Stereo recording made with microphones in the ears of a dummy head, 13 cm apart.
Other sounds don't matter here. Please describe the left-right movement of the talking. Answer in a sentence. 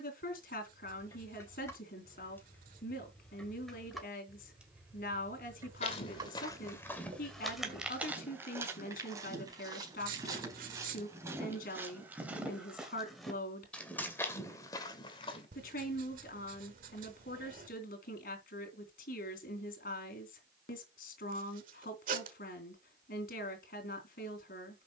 In this clip you hear the talking stay in one place.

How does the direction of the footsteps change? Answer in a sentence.
In this clip you hear the footsteps move from left to right and back again.